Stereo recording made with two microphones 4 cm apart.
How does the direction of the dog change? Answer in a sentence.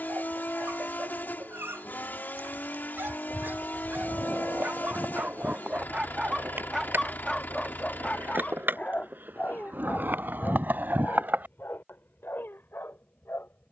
You can hear the dog go from the right side to the left.